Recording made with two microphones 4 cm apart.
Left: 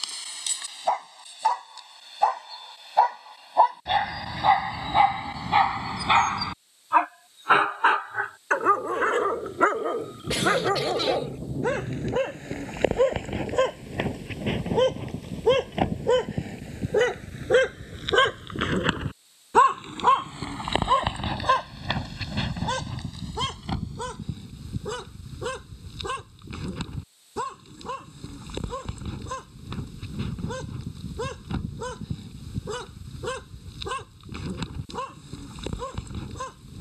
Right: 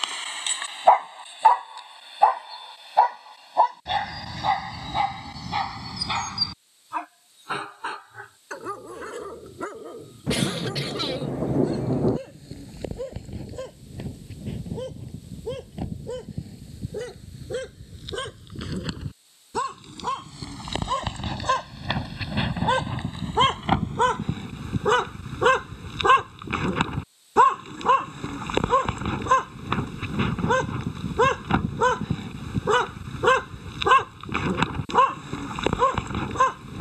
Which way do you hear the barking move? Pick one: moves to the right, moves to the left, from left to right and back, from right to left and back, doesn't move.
from right to left and back.